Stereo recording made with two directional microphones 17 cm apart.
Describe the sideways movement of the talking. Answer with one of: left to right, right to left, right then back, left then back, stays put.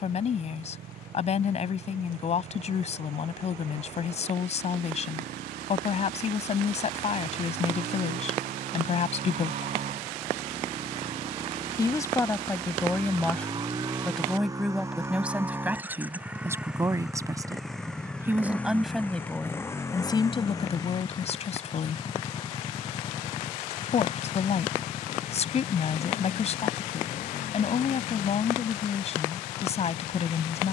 right then back.